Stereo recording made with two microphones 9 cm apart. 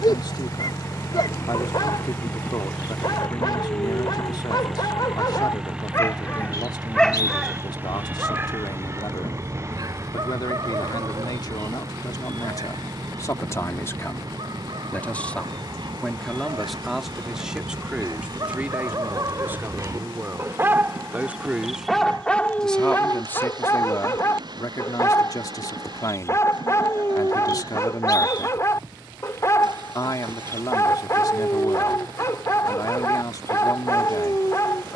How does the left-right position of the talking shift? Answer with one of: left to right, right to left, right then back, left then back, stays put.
right then back.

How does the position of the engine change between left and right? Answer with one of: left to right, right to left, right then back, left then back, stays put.
left to right.